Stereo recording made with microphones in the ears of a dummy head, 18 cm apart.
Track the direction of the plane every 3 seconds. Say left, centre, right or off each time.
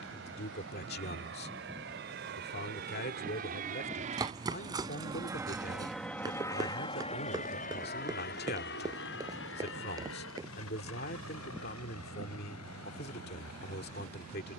right, right, left, left, left.